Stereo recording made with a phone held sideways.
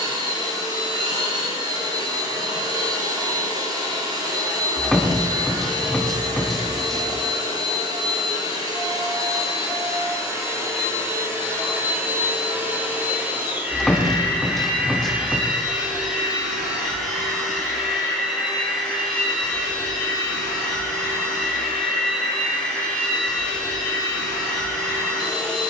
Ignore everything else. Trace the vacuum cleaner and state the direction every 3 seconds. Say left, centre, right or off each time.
right, right, right, right, centre, centre, centre, centre, centre.